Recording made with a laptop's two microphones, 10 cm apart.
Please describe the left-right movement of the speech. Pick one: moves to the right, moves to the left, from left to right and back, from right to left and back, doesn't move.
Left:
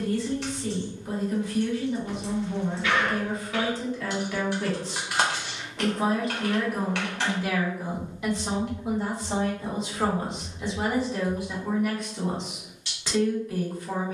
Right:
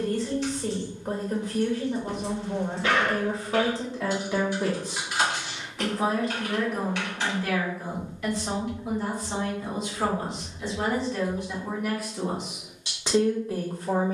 from right to left and back.